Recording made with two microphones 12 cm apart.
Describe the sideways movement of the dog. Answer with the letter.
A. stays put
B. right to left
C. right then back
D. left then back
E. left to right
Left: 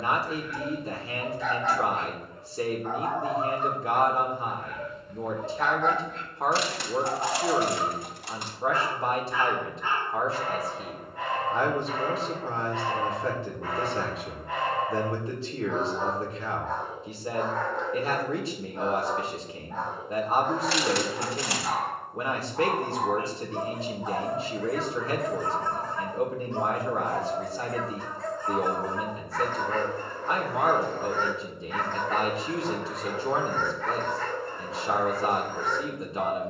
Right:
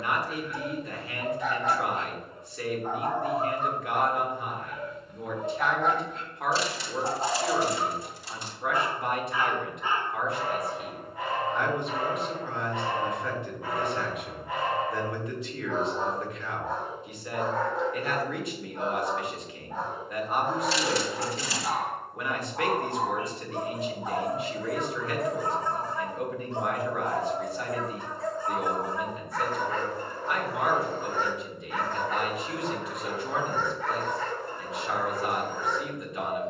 A.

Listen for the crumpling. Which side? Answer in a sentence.
In this clip you hear the crumpling on the left.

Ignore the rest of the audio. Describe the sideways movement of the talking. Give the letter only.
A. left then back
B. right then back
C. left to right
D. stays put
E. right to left
D.